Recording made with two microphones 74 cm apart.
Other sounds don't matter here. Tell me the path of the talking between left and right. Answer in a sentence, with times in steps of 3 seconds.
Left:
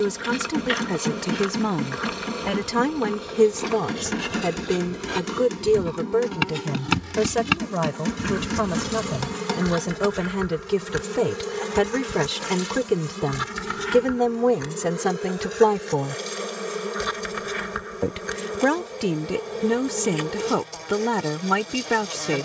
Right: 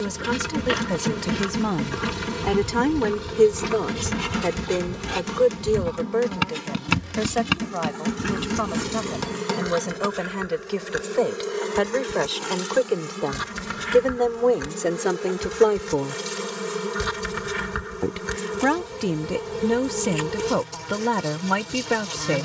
You can hear the talking in the centre from 0 s, on the left from 3 s and in the centre from 18 s.